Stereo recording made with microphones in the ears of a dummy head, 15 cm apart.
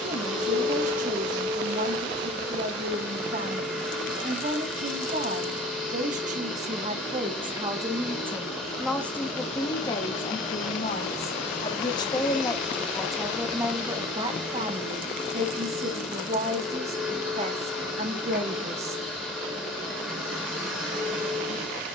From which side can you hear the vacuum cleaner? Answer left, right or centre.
centre.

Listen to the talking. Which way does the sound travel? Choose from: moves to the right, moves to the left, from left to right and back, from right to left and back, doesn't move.
from right to left and back.